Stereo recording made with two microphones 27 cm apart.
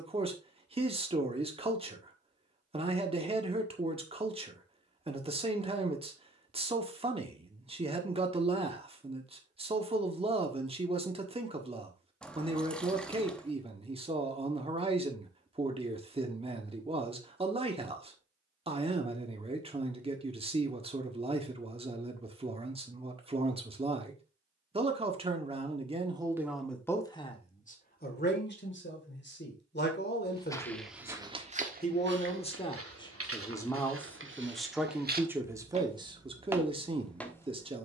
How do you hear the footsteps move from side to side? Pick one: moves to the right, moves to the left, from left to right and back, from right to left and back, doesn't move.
from left to right and back.